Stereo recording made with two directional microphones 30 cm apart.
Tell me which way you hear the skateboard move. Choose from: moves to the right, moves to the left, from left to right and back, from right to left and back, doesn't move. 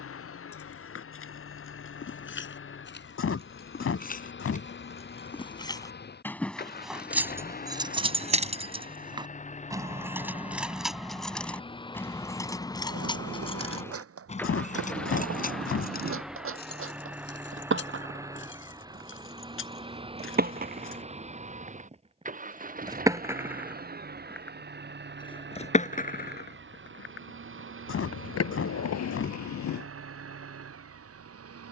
moves to the left.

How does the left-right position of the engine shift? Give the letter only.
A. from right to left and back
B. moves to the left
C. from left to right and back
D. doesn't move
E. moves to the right
E.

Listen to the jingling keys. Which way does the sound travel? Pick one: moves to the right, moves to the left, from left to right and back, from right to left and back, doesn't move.
from left to right and back.